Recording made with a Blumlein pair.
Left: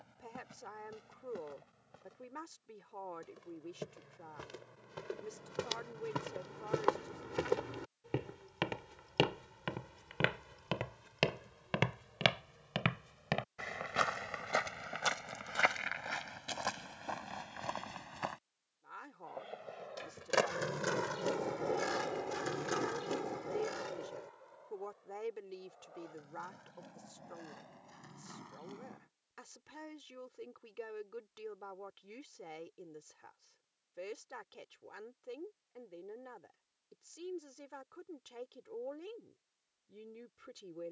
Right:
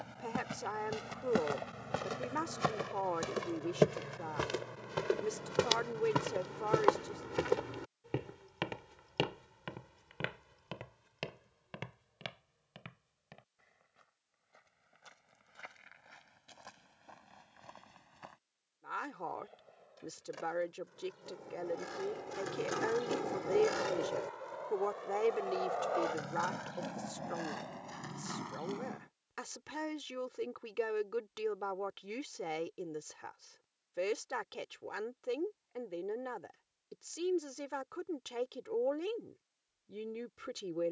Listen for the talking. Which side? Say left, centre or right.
right.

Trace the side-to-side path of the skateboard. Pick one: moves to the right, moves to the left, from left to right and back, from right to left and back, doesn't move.
moves to the right.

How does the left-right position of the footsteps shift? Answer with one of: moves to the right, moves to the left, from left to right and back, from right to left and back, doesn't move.
moves to the left.